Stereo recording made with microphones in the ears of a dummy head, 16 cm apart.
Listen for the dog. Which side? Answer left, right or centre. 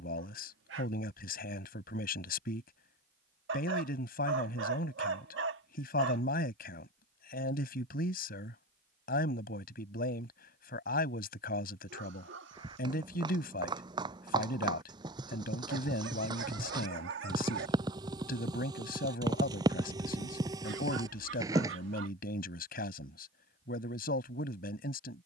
right.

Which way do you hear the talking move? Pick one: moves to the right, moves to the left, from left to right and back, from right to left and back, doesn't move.
doesn't move.